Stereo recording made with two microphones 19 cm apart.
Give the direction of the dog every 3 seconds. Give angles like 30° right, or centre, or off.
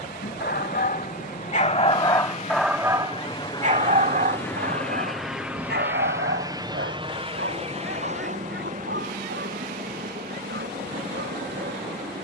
30° left, 50° right, 70° right, 80° right.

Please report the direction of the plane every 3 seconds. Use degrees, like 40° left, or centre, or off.
50° left, 10° left, 30° right, 50° right.